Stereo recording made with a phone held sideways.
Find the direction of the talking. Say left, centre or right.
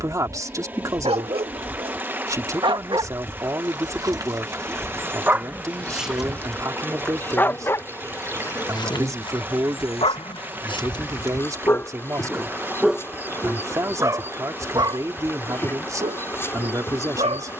right.